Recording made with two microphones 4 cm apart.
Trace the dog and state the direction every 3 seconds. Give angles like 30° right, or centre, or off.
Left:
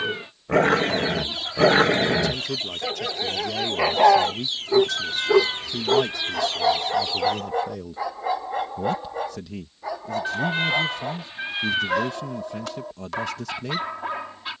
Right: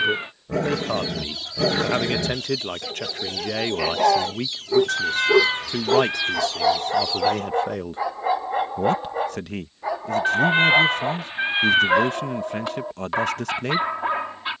50° left, 20° left, 10° right, 20° right, 30° right.